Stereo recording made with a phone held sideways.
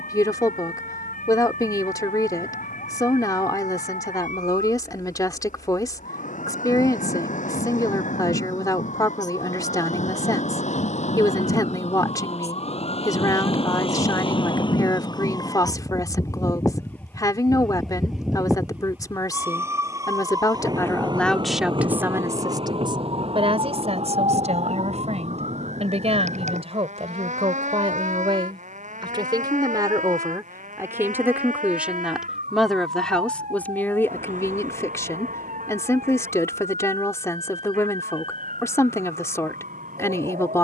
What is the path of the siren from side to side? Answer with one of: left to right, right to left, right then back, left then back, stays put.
left to right.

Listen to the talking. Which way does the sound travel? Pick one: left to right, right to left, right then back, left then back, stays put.
right then back.